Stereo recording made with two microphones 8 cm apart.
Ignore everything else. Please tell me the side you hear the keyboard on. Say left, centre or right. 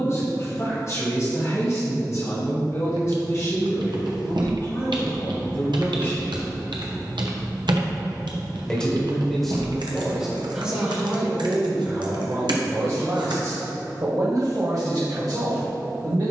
right.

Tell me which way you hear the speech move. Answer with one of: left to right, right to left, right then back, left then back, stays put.
left to right.